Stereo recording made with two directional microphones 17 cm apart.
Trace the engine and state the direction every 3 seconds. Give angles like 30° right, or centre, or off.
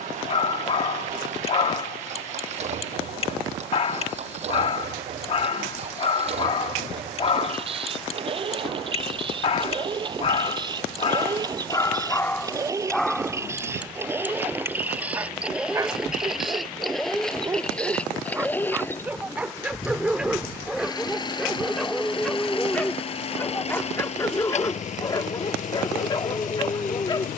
50° right, 40° right, 40° right, 30° right, 20° right, centre, 20° left, 30° left, 50° left.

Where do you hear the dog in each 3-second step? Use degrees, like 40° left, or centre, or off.
40° left, 40° left, 40° left, 30° left, centre, 20° right, 10° right, 10° left, 20° left.